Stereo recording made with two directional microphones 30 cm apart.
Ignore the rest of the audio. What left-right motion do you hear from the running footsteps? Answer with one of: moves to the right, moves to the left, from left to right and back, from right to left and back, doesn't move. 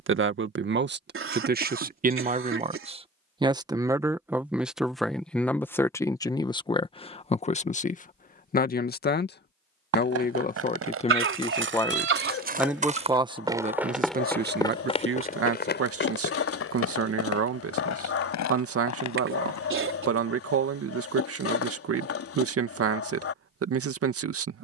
moves to the left.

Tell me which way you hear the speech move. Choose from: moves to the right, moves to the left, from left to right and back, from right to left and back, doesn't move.
from right to left and back.